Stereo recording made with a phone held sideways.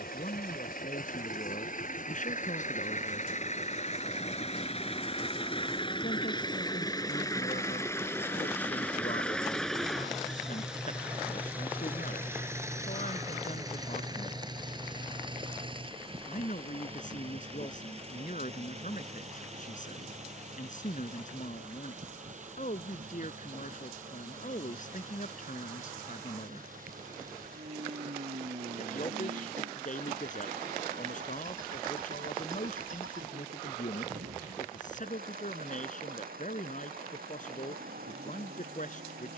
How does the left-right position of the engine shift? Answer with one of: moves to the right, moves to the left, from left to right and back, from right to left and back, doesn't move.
moves to the right.